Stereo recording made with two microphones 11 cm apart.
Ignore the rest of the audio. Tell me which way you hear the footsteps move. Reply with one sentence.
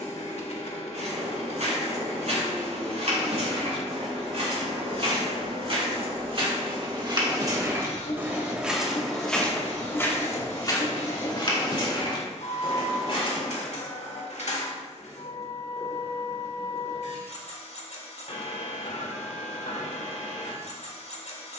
In this clip you hear the footsteps go from the right side to the left.